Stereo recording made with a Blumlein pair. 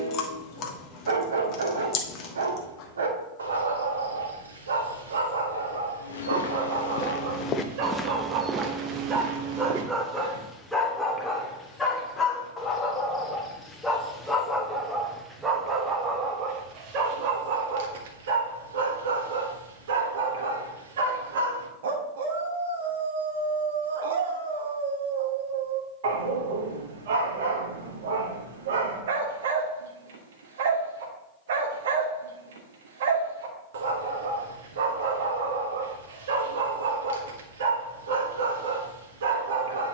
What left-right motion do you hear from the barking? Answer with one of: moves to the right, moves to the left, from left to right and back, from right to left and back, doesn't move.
from right to left and back.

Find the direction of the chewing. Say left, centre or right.
left.